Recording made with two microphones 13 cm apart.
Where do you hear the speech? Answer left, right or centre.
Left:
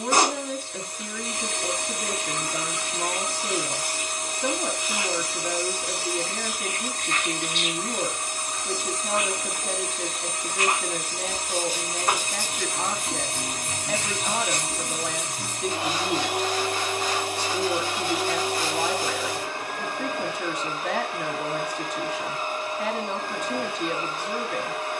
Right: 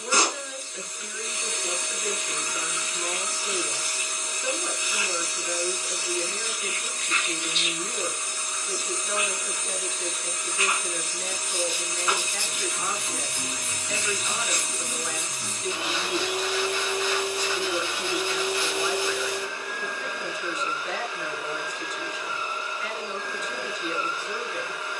left.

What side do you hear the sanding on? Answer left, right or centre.
left.